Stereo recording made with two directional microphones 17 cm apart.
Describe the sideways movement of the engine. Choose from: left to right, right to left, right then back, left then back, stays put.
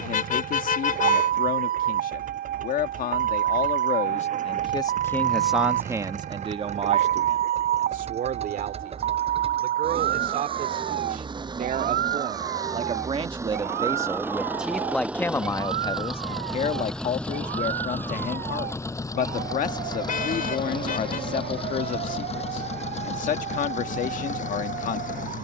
right to left.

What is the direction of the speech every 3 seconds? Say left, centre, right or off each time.
left, left, right, right, right, left, left, left, left.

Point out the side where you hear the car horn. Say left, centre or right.
left.